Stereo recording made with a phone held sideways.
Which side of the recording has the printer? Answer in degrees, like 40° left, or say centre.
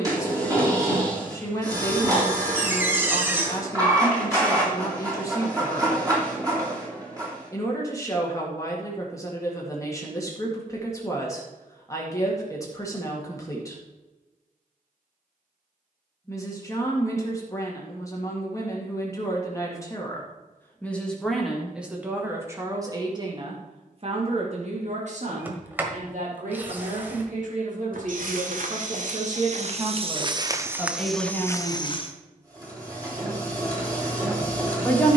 30° right.